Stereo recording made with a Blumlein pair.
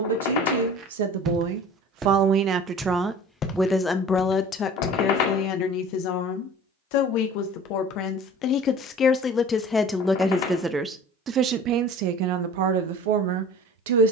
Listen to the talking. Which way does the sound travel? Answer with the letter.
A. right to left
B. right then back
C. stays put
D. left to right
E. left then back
E.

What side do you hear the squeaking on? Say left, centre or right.
left.